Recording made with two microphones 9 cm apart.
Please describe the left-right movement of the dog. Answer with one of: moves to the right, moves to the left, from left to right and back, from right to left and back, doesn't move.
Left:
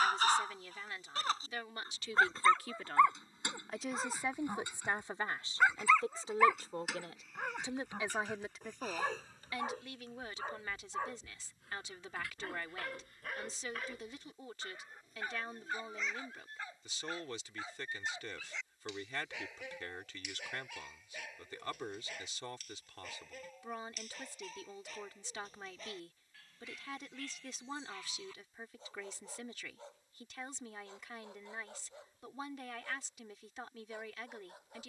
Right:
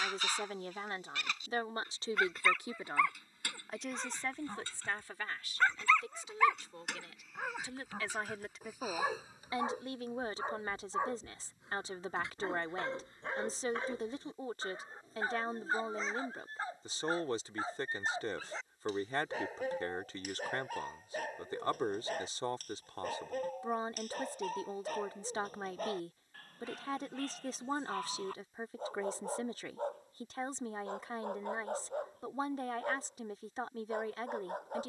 moves to the right.